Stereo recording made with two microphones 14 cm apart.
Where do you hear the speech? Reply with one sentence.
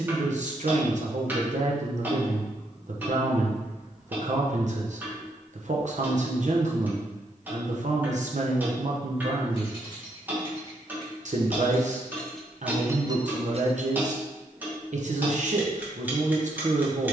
In this clip you hear the speech on the right.